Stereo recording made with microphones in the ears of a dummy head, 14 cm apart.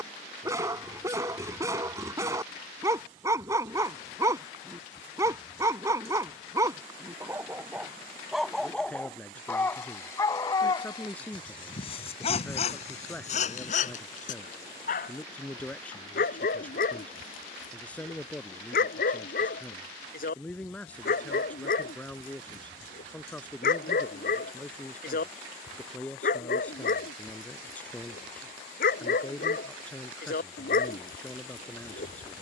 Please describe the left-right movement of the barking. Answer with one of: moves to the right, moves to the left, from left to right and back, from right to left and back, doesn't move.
moves to the left.